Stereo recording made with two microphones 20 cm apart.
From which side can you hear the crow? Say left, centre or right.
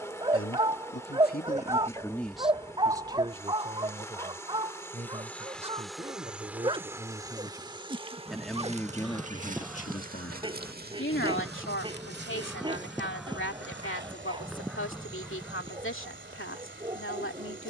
centre.